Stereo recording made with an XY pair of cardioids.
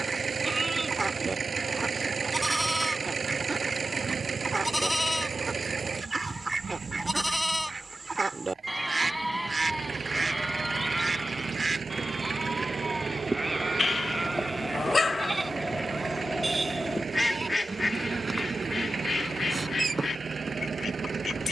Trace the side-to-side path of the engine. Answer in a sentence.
In this clip you hear the engine stay put.